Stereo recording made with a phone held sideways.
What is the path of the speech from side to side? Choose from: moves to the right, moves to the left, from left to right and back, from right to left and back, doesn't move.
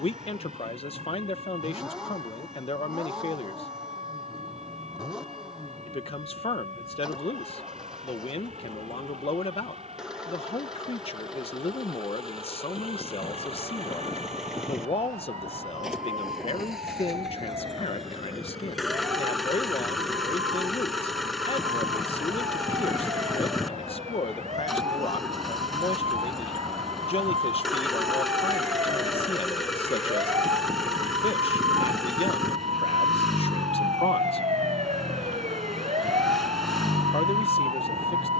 doesn't move.